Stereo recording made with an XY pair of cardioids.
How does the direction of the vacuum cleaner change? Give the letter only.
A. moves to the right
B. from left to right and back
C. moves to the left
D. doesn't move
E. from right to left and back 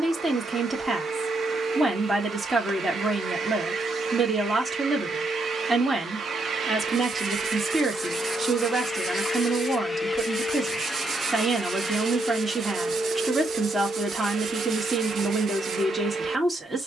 E.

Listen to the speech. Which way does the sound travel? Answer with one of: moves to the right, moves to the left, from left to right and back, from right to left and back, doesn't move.
doesn't move.